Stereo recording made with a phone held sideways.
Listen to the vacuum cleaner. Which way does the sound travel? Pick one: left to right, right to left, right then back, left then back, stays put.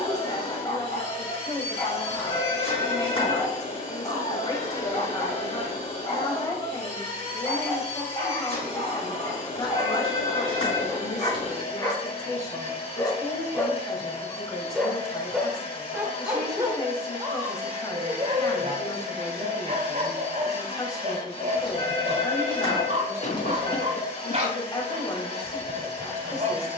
stays put.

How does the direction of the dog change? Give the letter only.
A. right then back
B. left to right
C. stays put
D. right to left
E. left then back
B.